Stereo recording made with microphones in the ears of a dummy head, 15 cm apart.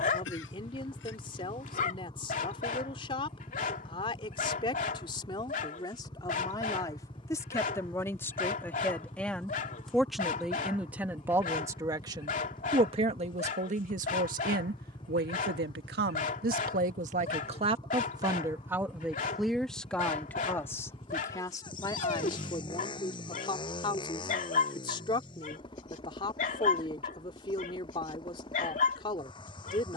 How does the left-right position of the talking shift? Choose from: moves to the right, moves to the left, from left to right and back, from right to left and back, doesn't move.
from left to right and back.